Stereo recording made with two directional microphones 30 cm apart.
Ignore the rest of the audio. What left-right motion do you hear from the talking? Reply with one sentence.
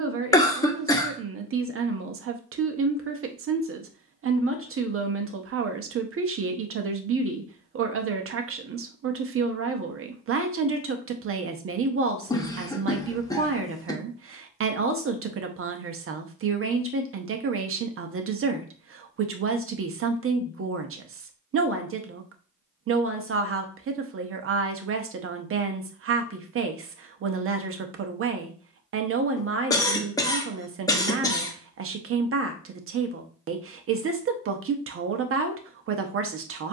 In this clip you hear the talking stay in one place.